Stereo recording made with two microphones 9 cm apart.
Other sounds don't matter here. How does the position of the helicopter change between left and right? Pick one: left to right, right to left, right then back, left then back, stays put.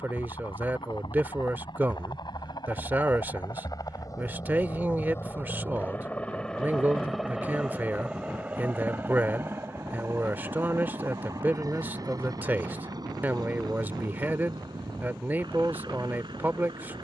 left to right.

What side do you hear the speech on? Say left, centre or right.
right.